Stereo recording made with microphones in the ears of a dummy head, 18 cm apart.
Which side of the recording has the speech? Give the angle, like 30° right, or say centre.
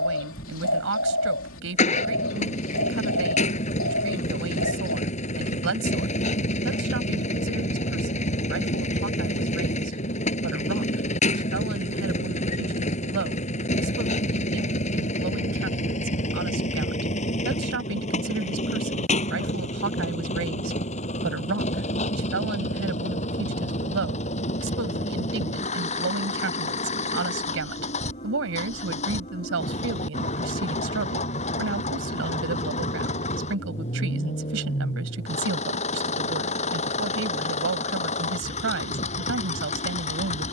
70° right.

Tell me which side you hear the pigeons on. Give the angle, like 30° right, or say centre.
80° left.